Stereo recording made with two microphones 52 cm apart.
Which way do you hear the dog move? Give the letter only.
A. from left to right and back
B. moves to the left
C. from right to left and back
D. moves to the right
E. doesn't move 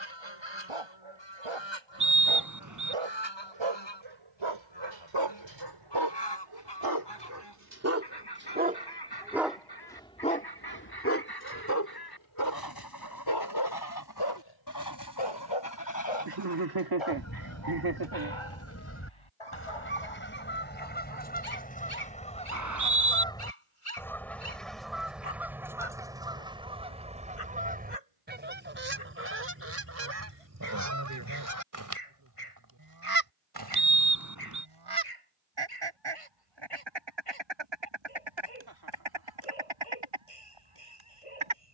B.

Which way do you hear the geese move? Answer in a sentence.
In this clip you hear the geese go from the left side to the right.